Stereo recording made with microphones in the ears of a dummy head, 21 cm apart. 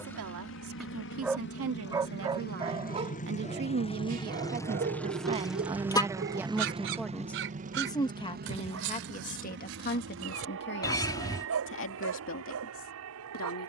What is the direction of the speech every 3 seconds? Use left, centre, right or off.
right, right, centre, left, left.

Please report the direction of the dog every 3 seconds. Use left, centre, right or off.
centre, right, right, right, right.